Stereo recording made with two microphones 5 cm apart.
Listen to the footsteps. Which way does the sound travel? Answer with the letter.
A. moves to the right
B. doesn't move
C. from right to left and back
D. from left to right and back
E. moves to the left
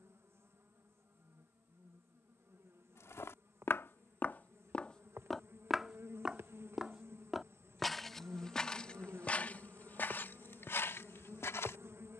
D.